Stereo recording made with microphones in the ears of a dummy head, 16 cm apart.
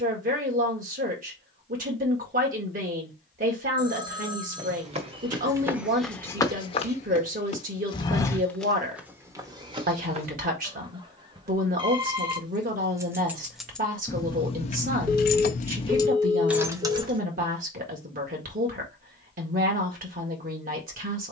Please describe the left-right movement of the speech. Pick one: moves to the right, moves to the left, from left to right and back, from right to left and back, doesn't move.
doesn't move.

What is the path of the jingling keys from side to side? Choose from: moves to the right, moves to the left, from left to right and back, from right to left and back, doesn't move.
from right to left and back.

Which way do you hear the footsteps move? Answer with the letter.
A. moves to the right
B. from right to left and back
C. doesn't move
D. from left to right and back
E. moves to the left
B.